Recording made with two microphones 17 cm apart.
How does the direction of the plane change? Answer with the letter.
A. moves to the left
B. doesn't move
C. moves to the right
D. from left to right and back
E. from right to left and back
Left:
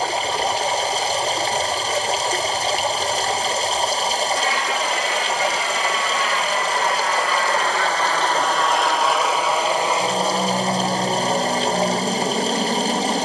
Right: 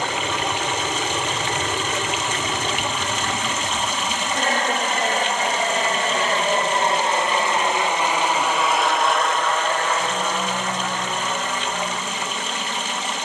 A.